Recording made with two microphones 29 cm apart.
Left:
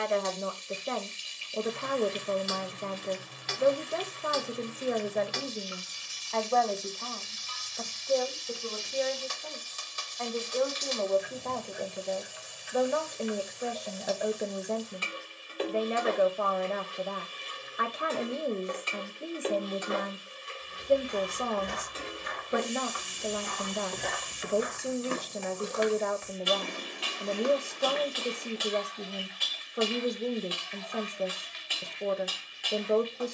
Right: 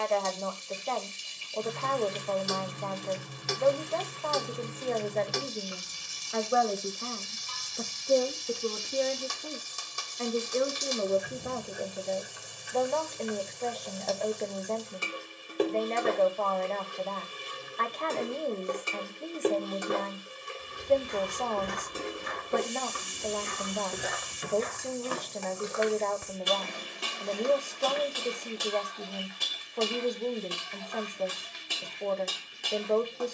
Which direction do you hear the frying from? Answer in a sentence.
In this clip you hear the frying on the right.